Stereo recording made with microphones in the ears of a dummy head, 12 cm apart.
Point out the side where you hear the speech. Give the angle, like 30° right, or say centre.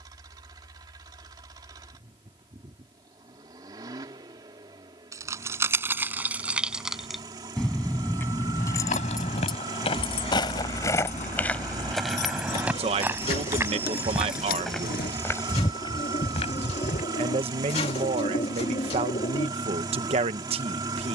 50° right.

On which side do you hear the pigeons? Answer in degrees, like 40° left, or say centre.
40° left.